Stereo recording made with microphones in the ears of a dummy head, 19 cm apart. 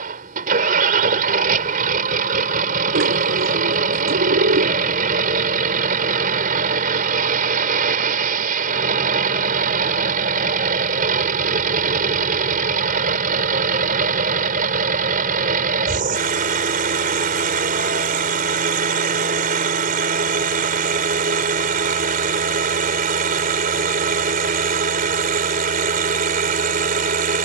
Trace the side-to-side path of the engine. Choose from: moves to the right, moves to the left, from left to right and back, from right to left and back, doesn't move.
doesn't move.